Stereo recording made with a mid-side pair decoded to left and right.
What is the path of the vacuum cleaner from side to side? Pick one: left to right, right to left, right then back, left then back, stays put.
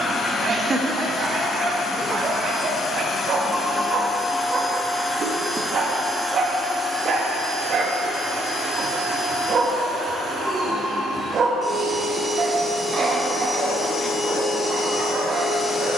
right then back.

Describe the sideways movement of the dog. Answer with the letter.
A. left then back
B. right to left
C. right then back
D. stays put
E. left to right
D.